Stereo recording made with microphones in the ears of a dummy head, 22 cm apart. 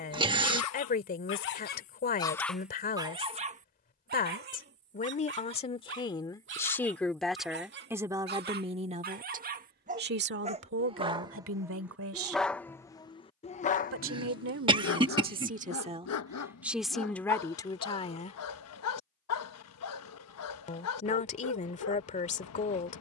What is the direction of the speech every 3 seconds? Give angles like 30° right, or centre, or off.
40° left, 30° left, centre, 50° right, 60° right, 10° right, 30° left, 30° left.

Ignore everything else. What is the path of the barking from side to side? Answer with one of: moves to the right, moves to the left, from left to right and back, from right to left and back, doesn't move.
from left to right and back.